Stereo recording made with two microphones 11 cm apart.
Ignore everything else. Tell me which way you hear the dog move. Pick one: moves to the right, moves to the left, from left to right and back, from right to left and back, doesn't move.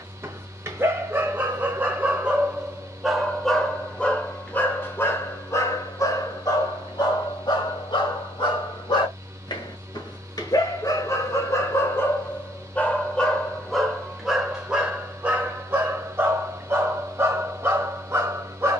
from right to left and back.